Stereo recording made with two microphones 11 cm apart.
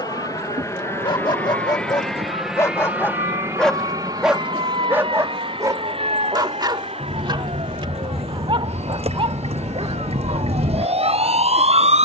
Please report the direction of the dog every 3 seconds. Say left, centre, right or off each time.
left, centre, right, right.